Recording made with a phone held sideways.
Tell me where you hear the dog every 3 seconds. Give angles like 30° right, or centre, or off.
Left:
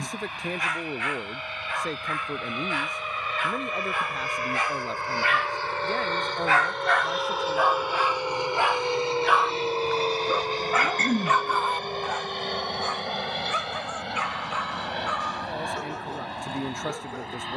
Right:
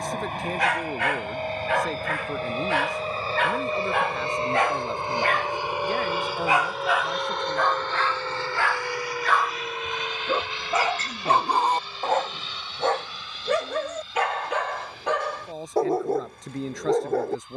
70° right, 60° right, centre, 20° right, 60° right, 70° right.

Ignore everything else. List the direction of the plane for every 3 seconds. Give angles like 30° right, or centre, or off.
50° right, 30° right, centre, 40° left, 60° left, 70° left.